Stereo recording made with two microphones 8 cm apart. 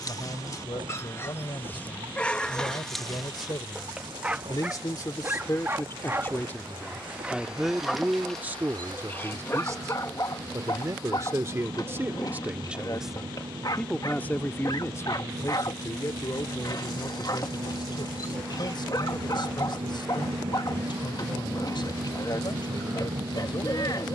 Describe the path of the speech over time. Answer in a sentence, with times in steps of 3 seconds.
You can hear the speech on the left from 0 s, in the centre from 6 s, on the right from 9 s, in the centre from 12 s and on the left from 15 s.